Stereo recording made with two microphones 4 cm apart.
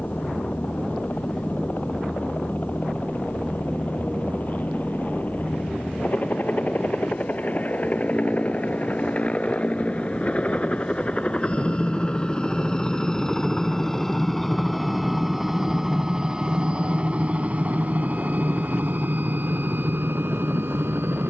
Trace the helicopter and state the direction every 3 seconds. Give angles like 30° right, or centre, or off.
50° left, 50° left, 40° left, 30° left, 10° left, 20° right, 60° right.